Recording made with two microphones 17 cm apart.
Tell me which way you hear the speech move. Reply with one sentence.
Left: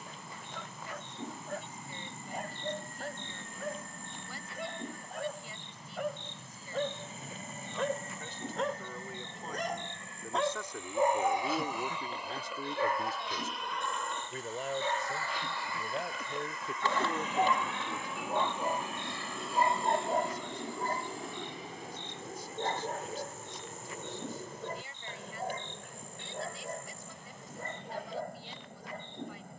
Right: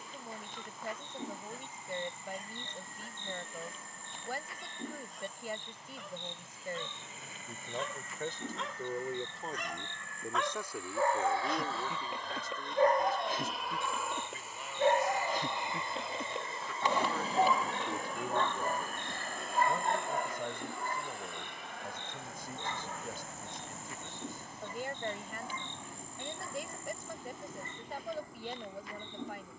You can hear the speech move from right to left and back again.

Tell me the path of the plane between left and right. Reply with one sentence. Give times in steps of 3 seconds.
You can hear the plane on the left from 0 s, in the centre from 12 s and on the right from 15 s.